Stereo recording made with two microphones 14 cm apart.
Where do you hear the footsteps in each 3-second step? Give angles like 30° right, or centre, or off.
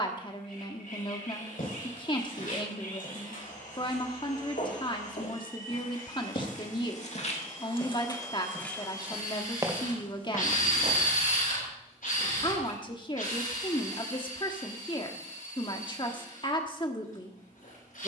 80° left, 70° left, 40° left, 30° right, off, off.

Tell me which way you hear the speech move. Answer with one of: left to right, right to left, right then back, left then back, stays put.
stays put.